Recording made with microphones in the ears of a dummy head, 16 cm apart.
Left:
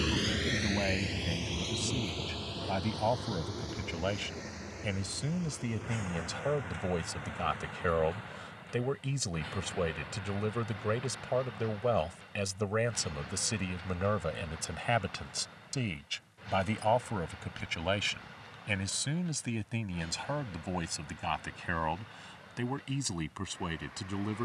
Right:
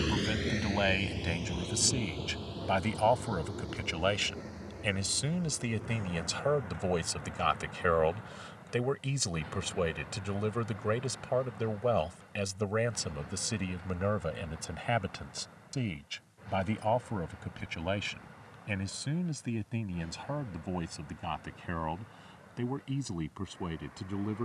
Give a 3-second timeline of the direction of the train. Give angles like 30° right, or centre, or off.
40° left, 60° left, 60° left, 60° left, 60° left, 70° left, 70° left, 70° left.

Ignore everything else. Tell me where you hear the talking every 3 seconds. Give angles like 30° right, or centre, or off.
40° right, 30° right, 20° right, centre, 20° left, 30° left, 40° left, 50° left.